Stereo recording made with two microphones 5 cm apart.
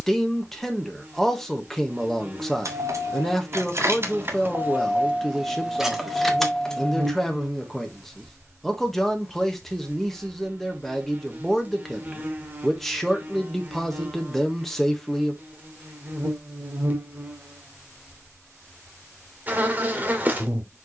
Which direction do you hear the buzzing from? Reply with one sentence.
In this clip you hear the buzzing on the right.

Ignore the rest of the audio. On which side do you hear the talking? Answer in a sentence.
In this clip you hear the talking in the centre.